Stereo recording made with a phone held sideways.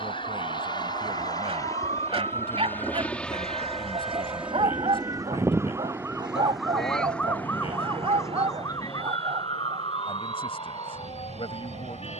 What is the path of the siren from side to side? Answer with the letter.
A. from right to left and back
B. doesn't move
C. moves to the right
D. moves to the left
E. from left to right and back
D.